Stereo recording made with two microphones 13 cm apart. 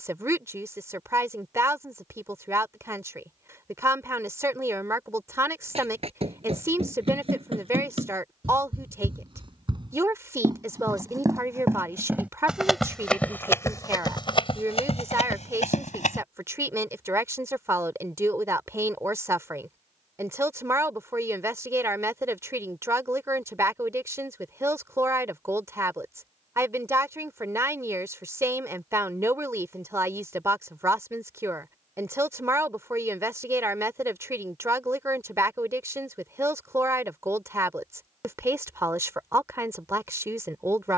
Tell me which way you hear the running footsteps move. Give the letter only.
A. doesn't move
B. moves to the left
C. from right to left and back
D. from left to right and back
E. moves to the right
B.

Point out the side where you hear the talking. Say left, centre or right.
right.